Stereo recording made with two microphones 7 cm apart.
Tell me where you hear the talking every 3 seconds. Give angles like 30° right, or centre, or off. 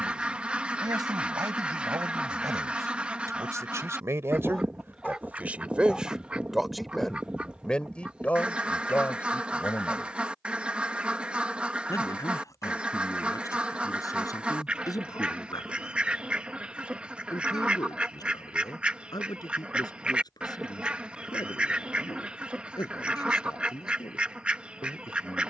60° right, 30° right, 10° left, 40° left, 50° left, 60° left, 70° left, 70° left, 70° left.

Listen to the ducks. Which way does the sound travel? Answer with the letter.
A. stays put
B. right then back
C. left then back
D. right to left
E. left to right
A.